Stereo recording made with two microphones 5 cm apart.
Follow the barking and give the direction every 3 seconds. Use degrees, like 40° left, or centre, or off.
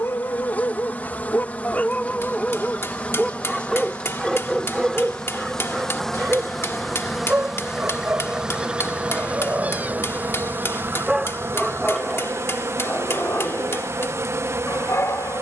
30° left, 10° right, 30° right, 20° right, 40° left.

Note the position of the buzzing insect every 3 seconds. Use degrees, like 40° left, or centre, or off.
30° left, 20° left, 10° right, 40° right, 50° right.